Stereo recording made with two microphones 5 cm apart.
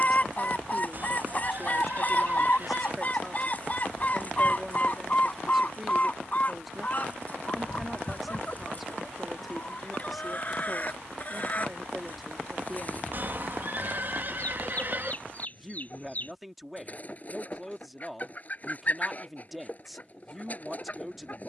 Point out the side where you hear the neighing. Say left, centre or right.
right.